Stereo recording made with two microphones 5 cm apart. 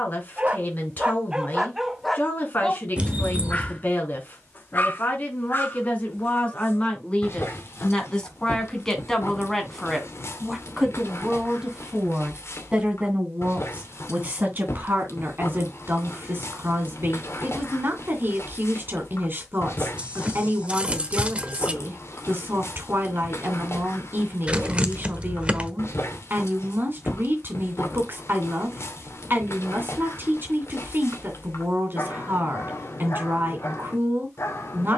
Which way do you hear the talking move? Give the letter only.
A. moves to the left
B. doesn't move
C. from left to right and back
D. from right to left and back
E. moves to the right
E.